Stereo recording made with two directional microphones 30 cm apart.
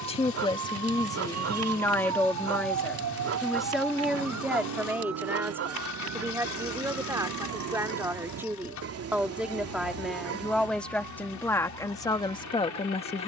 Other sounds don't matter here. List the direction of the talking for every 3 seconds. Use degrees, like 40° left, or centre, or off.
10° left, centre, 10° right, centre, 20° left.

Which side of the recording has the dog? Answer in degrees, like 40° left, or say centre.
50° right.